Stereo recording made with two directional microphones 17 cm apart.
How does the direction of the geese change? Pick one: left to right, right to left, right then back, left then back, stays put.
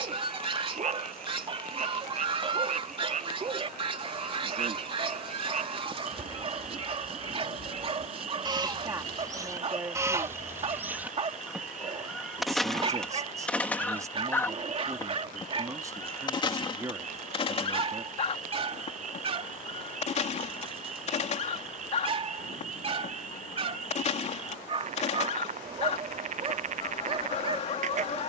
right to left.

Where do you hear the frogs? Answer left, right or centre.
right.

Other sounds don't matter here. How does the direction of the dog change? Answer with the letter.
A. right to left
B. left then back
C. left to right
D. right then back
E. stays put
E.